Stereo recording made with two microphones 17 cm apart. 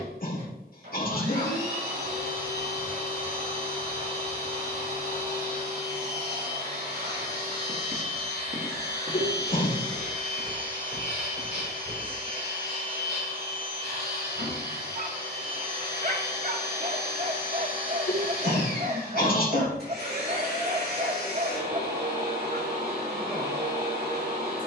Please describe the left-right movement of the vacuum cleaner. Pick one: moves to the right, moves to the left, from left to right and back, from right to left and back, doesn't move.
doesn't move.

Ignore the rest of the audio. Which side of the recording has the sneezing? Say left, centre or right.
left.